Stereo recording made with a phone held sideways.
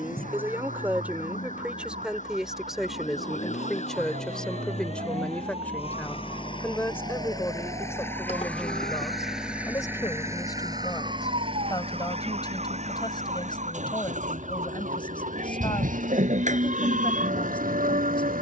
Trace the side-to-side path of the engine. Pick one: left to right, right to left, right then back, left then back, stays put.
left to right.